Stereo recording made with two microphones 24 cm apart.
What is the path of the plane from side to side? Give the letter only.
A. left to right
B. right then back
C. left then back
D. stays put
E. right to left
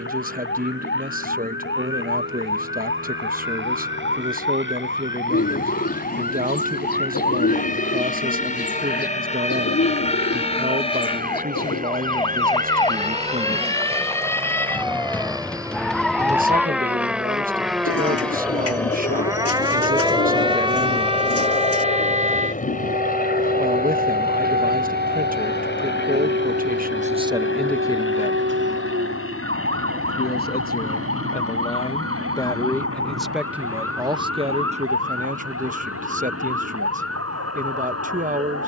E.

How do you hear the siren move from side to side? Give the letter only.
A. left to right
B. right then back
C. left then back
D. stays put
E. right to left
A.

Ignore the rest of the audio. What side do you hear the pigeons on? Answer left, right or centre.
left.